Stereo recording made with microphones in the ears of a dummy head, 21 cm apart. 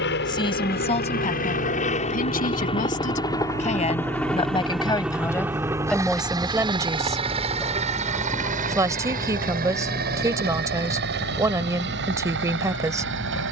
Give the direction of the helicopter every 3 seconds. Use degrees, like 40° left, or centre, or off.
30° left, centre, 20° right, 40° right, 50° right.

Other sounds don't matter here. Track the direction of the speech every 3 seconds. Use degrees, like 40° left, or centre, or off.
30° left, 20° left, 10° right, 10° right, 10° right.